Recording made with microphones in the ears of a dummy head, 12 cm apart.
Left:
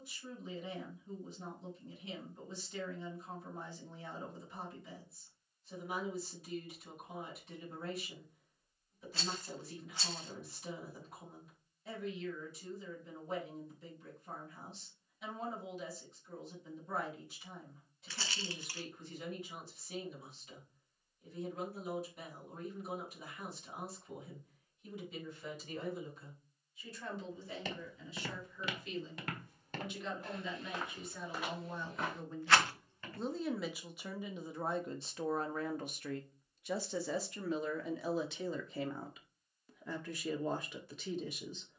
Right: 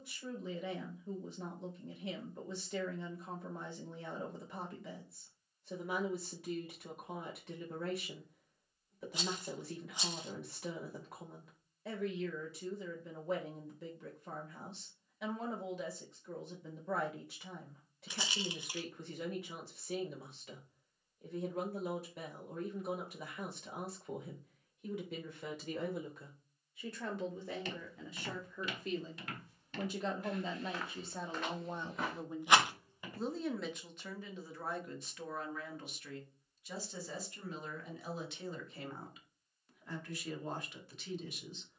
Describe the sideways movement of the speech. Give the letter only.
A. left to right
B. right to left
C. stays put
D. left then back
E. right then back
B.